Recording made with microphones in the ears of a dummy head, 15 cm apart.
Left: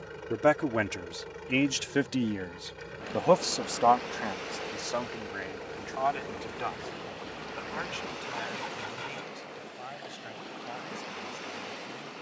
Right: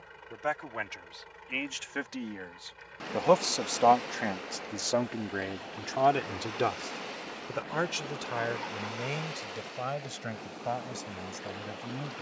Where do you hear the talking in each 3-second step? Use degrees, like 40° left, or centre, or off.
50° left, 20° right, 60° right, 70° right.